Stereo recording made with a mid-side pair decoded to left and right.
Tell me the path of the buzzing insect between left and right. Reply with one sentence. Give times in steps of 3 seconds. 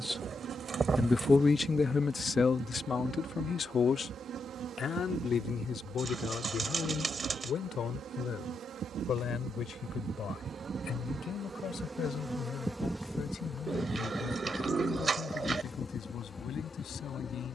In this clip you hear the buzzing insect on the right from 0 s, in the centre from 12 s and on the left from 15 s.